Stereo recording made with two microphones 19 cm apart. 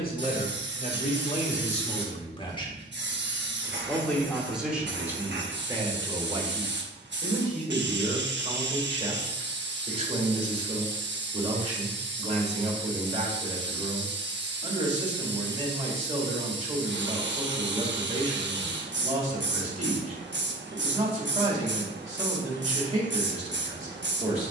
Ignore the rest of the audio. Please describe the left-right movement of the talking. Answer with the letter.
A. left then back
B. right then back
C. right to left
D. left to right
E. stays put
D.